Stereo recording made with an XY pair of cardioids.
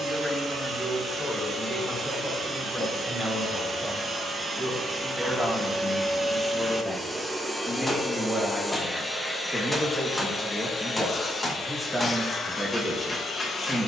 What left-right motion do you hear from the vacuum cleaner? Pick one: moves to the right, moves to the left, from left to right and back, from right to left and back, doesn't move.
moves to the left.